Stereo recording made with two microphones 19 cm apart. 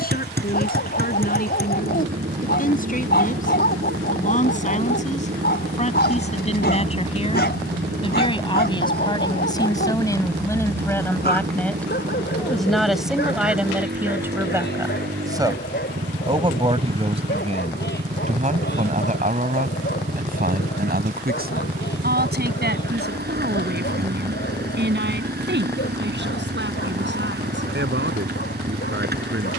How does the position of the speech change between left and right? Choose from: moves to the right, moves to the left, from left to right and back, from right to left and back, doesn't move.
moves to the right.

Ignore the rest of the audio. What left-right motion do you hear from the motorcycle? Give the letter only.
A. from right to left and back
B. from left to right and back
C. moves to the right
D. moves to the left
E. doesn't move
E.